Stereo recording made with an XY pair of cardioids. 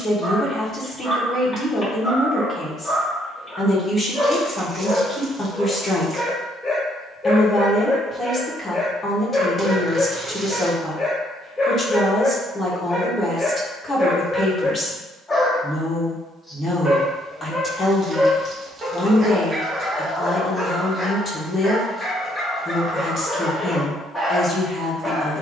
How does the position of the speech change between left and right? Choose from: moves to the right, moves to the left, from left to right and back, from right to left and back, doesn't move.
doesn't move.